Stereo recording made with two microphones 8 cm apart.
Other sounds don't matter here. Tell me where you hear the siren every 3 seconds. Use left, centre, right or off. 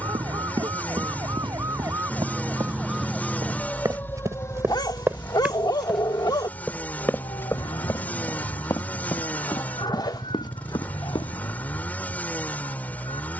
right, left, left, left, left.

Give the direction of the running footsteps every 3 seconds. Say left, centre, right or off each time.
right, right, left, left, off.